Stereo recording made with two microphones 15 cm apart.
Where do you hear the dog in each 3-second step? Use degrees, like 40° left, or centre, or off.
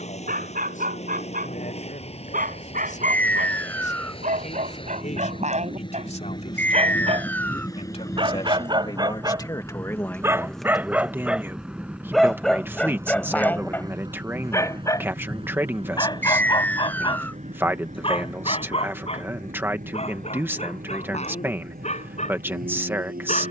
70° right, 60° right, 40° right, 10° right, 10° left, 30° left, 40° left, 50° left.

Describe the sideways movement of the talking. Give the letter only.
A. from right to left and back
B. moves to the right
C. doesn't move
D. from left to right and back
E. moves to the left
B.